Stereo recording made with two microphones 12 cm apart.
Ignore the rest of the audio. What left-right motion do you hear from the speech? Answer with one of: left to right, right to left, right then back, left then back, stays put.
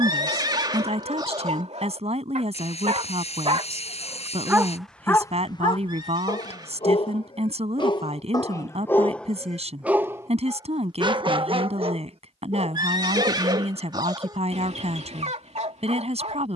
stays put.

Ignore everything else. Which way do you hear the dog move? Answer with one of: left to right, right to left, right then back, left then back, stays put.
left then back.